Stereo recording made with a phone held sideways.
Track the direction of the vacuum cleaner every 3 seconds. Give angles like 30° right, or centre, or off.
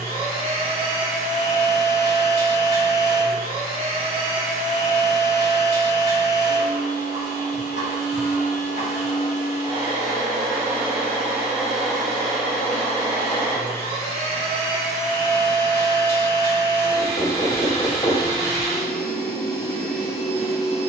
60° right, 60° right, 50° right, 20° right, 10° left, 20° left, 20° left.